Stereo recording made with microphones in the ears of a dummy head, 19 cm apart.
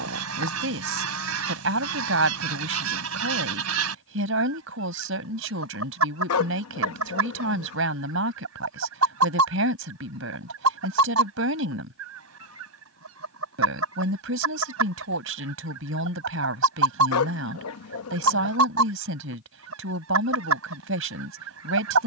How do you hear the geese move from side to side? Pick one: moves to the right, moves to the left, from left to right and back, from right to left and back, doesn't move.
doesn't move.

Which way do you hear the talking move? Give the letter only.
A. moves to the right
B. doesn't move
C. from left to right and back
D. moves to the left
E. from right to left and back
B.